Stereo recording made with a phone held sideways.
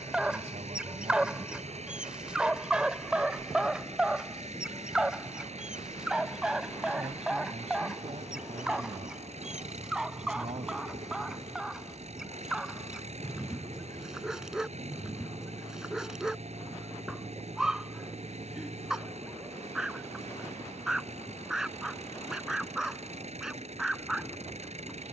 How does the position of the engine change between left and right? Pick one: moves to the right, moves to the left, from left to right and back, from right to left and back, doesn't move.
doesn't move.